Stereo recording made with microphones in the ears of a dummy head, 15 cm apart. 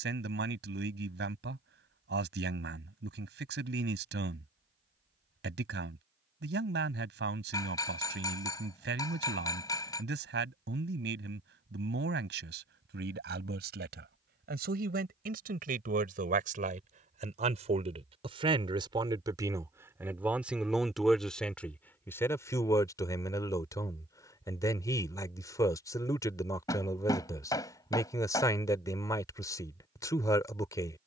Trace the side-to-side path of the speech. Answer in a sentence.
You can hear the speech go from the right side to the left.